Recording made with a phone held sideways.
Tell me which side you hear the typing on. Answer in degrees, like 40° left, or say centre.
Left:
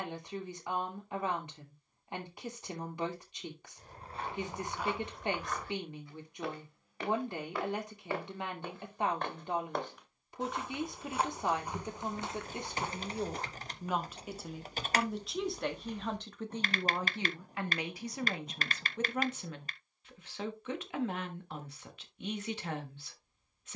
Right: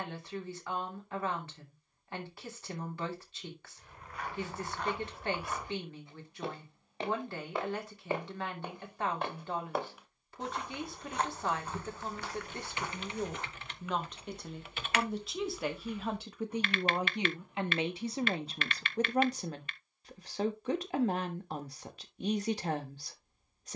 40° left.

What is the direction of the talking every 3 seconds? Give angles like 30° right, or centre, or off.
20° left, 20° left, 20° left, 20° left, 10° left, 10° right, 40° right, 40° right.